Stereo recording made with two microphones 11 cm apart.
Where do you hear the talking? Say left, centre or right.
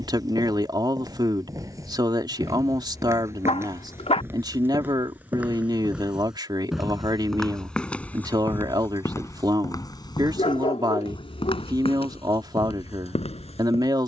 right.